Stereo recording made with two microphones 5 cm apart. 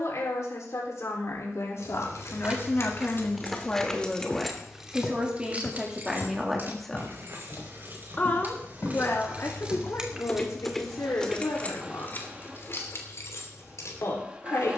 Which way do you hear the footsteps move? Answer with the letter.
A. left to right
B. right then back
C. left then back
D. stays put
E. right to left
C.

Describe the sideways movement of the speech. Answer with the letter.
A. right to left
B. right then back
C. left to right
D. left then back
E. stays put
B.